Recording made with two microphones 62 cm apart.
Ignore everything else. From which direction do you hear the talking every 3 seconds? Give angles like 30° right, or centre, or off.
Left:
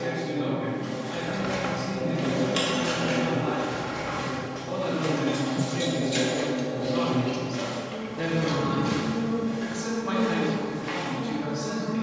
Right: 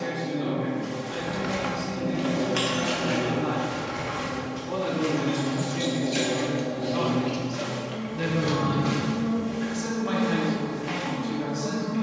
30° left, 10° left, 20° right, 60° right.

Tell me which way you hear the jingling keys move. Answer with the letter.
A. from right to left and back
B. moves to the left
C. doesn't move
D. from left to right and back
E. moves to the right
A.